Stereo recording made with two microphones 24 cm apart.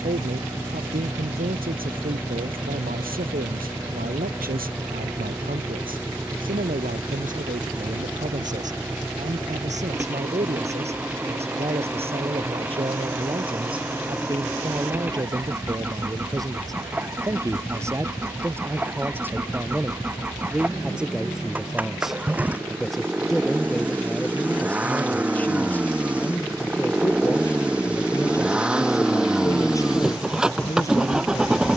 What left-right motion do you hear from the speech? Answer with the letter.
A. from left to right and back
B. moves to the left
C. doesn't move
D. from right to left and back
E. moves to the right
B.